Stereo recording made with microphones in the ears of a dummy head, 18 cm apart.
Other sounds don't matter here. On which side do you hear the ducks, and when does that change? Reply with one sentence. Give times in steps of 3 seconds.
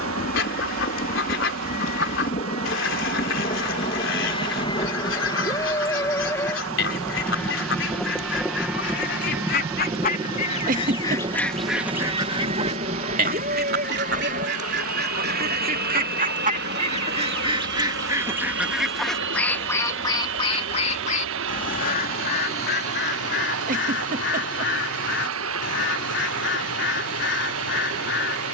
In this clip you hear the ducks on the left from 0 s, on the right from 12 s, in the centre from 18 s and on the left from 21 s.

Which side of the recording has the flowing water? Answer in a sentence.
You can hear the flowing water on the right.